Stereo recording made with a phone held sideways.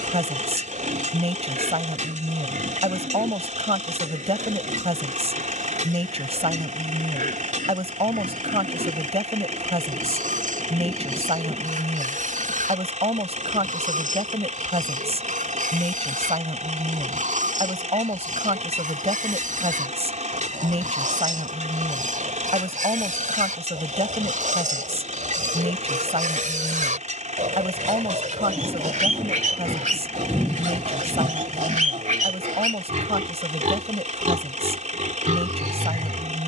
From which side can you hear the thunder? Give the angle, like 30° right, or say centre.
10° right.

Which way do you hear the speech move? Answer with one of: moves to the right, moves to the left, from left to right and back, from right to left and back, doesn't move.
doesn't move.